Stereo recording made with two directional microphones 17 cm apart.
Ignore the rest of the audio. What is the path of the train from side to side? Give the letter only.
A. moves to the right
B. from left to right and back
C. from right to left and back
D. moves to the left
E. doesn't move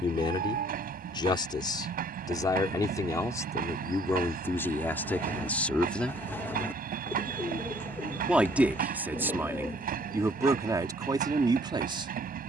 E.